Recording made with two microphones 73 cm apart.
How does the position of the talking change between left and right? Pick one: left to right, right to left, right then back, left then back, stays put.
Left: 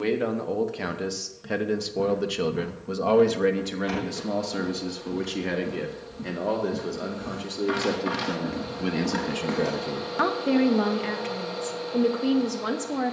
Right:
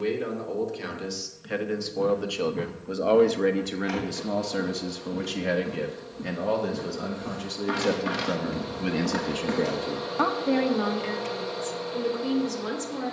right then back.